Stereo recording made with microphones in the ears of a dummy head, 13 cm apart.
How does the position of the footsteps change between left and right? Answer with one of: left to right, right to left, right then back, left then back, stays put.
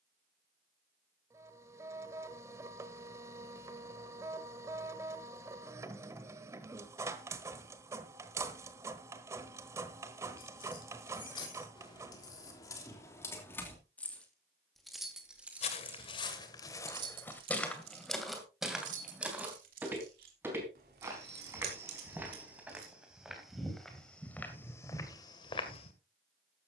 right then back.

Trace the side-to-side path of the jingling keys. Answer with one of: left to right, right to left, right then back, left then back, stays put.
left to right.